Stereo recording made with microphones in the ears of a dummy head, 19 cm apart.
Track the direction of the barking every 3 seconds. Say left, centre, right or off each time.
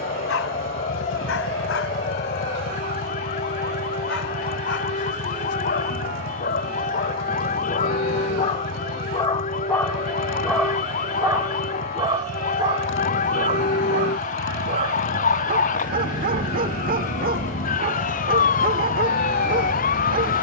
left, left, left, centre, right, right, right.